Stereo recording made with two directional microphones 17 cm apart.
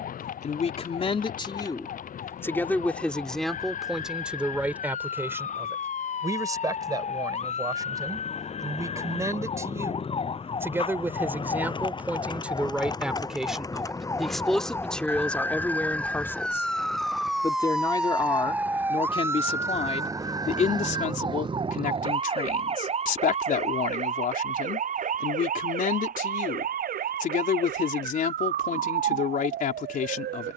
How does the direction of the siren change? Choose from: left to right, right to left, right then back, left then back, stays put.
left to right.